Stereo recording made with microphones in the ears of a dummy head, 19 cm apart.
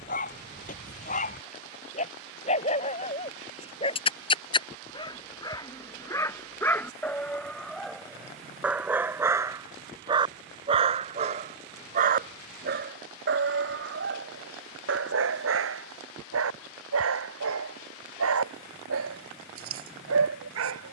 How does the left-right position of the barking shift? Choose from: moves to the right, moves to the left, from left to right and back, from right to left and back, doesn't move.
moves to the right.